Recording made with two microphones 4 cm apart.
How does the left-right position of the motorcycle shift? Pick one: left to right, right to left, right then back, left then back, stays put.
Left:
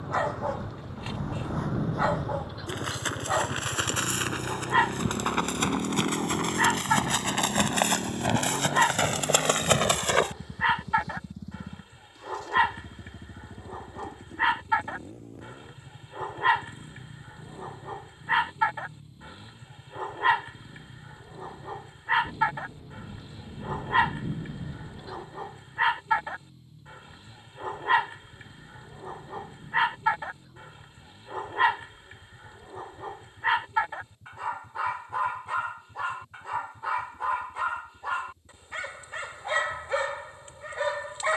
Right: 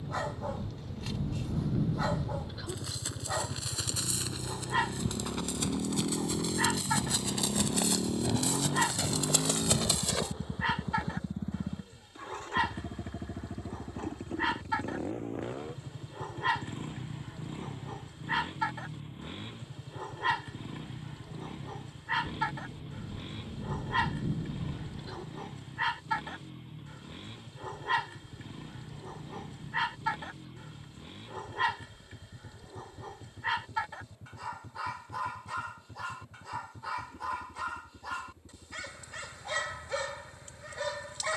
left to right.